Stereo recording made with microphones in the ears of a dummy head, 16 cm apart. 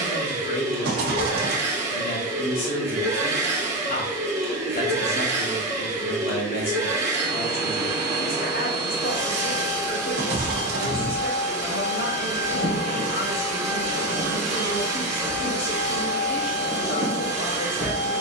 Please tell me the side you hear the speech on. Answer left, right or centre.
left.